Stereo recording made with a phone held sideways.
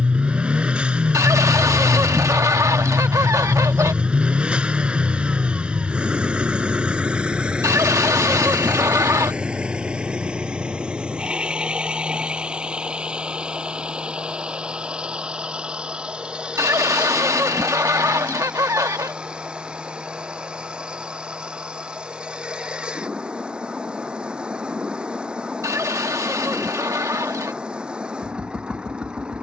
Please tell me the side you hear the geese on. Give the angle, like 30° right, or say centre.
20° right.